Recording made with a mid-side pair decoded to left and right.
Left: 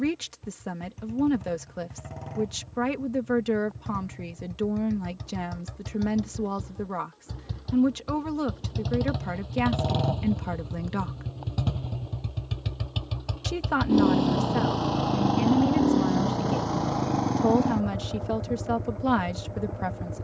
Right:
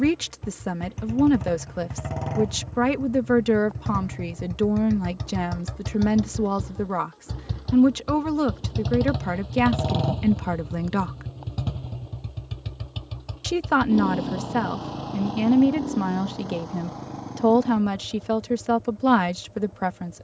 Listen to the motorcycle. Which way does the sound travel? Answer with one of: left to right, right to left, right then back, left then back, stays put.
right to left.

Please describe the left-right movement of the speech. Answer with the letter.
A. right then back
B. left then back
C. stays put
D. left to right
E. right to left
C.